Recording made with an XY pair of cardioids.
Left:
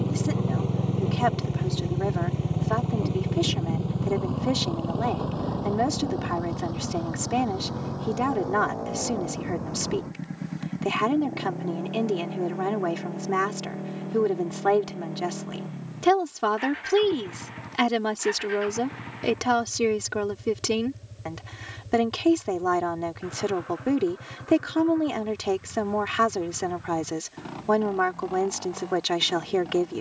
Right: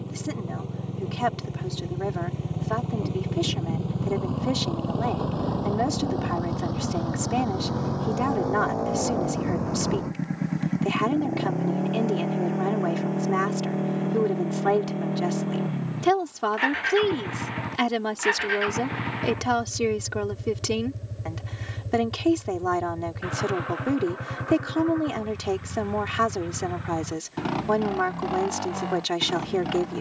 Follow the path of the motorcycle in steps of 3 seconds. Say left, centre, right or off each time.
left, centre, right, right, right, right, right, right, right, right.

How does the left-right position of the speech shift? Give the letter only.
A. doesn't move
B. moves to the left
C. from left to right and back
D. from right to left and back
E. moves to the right
A.